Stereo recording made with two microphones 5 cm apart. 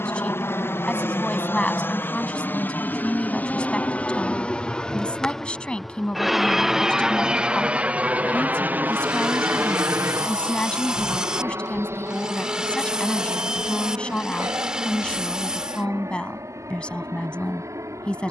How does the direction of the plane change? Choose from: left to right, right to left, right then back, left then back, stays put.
left to right.